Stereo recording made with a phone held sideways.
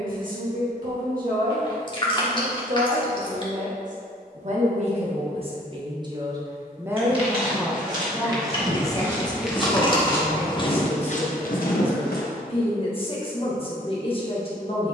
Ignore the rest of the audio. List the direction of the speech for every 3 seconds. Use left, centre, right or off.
right, right, centre, left, left.